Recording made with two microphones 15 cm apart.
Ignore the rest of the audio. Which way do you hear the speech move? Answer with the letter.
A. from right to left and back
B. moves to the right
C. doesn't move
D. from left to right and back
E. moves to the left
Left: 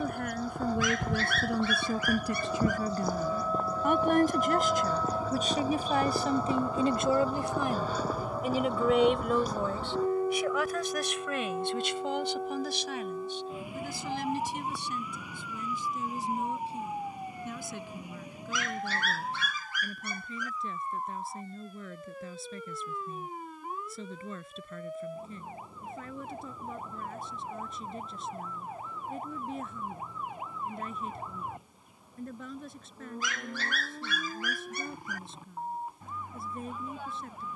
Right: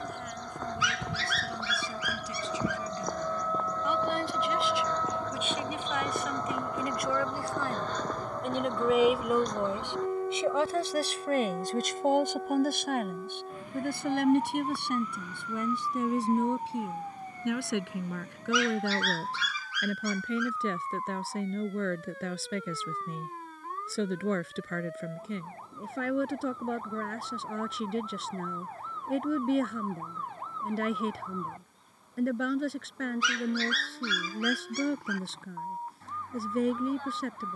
B.